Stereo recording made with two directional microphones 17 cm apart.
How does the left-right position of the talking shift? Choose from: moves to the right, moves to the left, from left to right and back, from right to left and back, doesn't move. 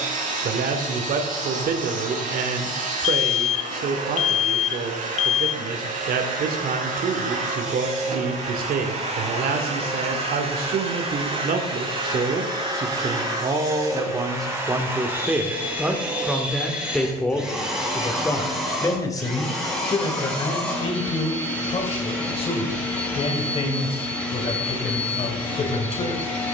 moves to the left.